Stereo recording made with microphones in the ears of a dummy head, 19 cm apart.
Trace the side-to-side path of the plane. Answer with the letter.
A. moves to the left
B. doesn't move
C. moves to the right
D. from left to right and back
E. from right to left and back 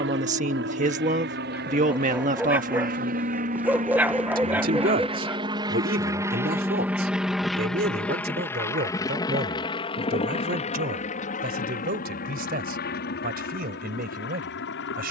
A.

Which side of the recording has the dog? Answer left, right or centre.
centre.